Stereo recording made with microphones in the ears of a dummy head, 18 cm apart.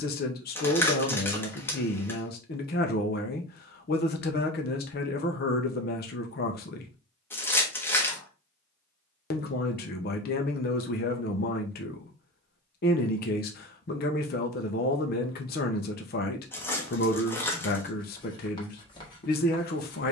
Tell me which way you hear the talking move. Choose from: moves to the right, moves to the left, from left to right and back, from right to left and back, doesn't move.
doesn't move.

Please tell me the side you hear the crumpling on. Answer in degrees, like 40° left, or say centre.
10° left.